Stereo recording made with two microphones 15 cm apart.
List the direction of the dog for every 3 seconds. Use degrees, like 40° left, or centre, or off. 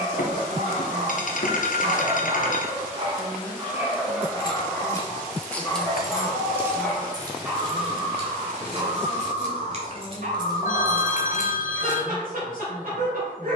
60° right, centre, 10° right, 60° right, 70° right.